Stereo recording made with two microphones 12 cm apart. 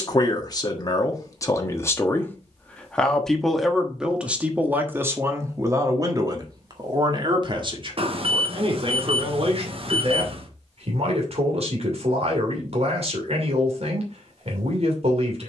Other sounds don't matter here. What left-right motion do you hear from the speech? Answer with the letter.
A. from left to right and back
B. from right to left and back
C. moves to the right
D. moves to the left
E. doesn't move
C.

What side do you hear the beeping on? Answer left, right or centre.
right.